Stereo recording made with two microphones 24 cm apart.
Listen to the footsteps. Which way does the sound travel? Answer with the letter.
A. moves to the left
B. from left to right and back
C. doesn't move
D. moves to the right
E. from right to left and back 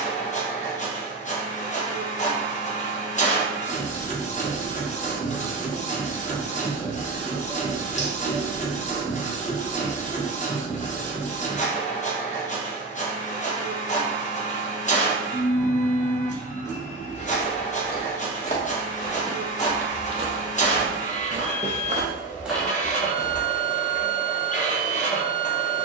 B.